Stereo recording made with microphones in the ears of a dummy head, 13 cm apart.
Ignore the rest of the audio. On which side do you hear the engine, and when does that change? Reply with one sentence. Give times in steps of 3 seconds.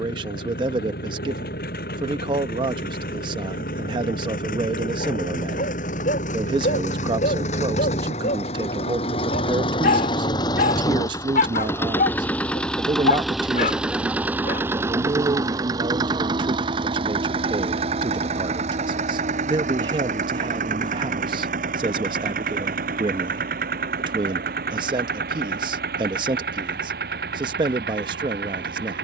You can hear the engine on the left from 0 s, in the centre from 12 s and on the right from 15 s.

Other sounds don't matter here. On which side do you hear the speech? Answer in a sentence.
In this clip you hear the speech on the right.